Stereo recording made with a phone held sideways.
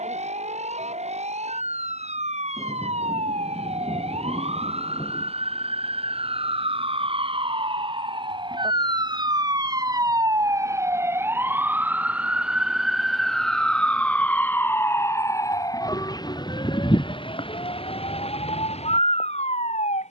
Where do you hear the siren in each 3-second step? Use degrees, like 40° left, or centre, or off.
60° right, 50° right, 40° right, 20° right, centre, 30° left, 50° left.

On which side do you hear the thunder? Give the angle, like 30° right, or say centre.
40° left.